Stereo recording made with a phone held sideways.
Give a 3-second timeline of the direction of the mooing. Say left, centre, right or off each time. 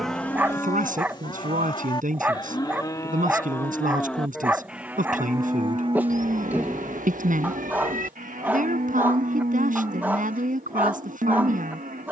left, centre, right, right.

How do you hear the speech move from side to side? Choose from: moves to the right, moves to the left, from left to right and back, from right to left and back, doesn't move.
doesn't move.